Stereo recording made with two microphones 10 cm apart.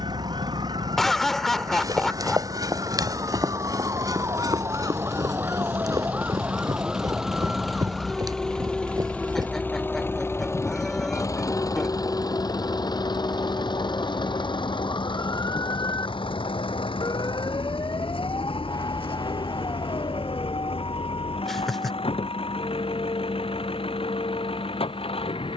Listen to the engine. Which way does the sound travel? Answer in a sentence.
In this clip you hear the engine move to the left.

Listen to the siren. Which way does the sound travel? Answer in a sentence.
You can hear the siren move to the left.